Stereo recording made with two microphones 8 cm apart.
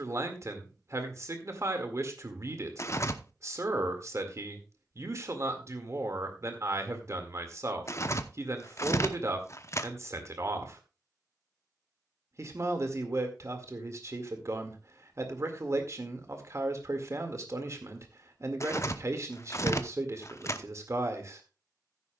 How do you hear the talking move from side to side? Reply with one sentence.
You can hear the talking stay put.